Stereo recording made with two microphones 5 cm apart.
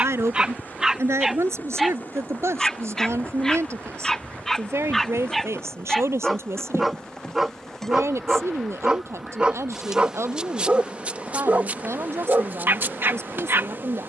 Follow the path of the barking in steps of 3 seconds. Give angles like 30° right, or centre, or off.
10° right, 10° left, 10° right, 30° right, 50° right.